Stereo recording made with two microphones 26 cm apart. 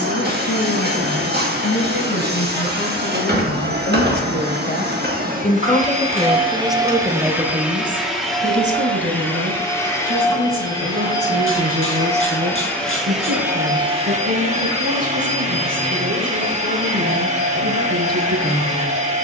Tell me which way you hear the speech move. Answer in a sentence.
In this clip you hear the speech move to the right.